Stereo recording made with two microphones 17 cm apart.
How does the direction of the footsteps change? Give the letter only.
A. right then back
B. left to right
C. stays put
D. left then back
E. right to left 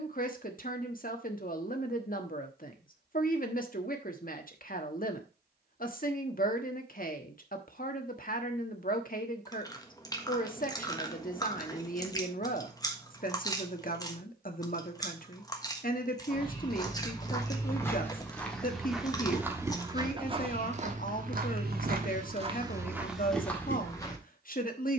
A.